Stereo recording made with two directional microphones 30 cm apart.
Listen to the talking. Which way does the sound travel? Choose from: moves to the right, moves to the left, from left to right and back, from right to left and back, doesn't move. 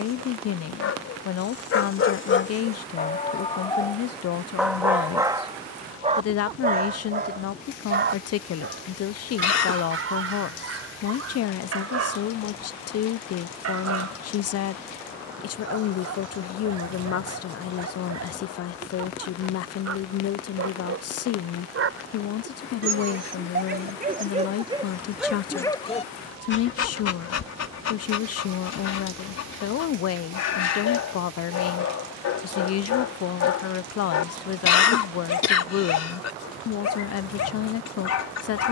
doesn't move.